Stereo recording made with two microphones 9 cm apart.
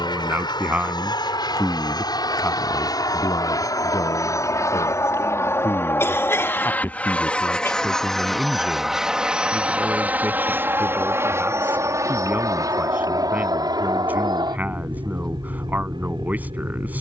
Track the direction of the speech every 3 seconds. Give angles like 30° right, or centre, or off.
centre, 50° left, 10° left, 20° right, 20° right, 20° right.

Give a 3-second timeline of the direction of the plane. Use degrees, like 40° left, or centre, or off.
50° left, 40° left, 10° left, 20° right, 40° right, 50° right.